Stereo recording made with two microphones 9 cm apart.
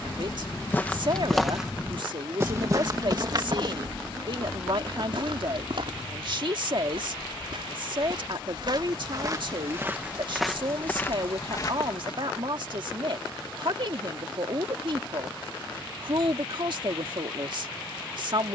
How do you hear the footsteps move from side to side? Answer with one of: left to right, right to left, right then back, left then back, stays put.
right then back.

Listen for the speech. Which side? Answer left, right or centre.
right.